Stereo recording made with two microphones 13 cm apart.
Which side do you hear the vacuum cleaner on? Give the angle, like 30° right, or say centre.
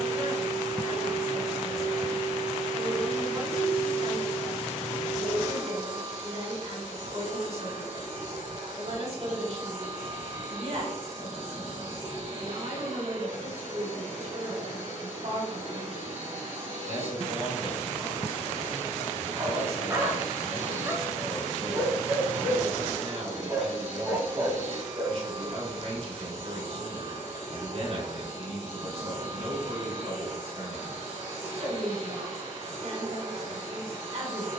60° right.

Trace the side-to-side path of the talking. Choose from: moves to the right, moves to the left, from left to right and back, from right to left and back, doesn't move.
doesn't move.